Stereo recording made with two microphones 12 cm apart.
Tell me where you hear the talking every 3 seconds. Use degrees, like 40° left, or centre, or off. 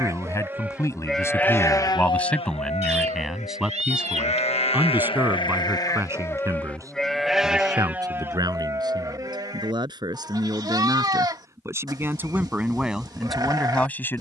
20° left, 10° right, 30° right, 30° right, centre.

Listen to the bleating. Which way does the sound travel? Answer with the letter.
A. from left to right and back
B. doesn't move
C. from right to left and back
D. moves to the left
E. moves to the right
C.